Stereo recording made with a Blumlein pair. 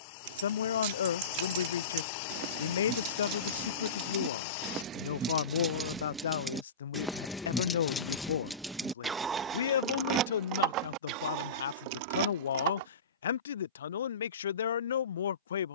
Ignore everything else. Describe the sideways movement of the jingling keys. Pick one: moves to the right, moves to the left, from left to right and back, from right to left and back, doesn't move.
from right to left and back.